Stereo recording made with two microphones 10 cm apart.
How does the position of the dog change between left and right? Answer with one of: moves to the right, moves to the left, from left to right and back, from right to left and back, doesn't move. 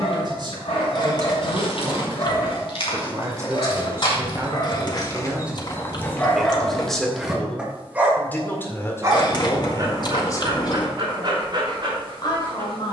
moves to the right.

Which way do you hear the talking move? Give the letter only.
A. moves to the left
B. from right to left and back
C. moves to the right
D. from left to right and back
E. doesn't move
A.